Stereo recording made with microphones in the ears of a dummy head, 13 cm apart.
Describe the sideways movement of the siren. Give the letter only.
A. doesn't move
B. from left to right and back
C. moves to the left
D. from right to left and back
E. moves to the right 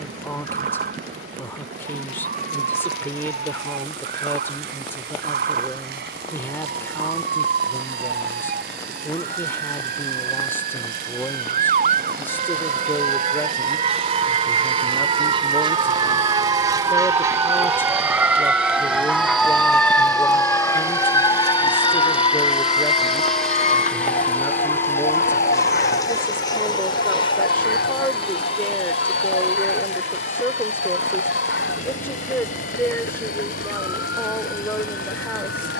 C.